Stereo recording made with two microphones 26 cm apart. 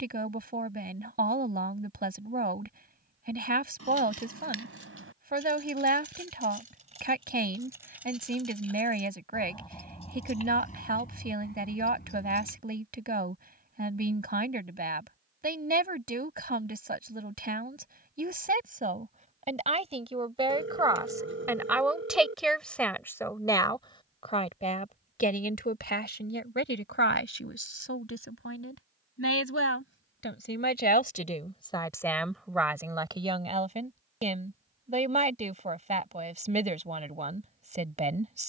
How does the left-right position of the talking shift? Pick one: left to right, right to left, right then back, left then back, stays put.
left then back.